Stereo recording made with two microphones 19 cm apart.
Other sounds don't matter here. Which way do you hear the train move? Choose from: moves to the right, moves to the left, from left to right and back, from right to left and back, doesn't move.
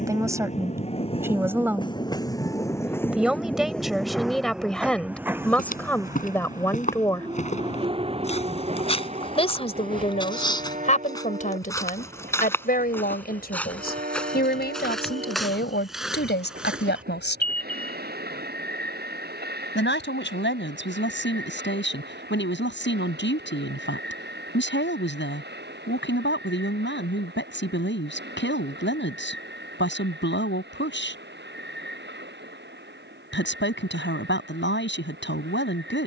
moves to the right.